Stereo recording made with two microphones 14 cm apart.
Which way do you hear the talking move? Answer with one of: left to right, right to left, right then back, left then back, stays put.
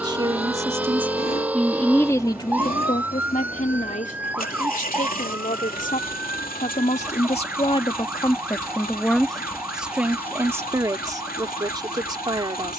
left then back.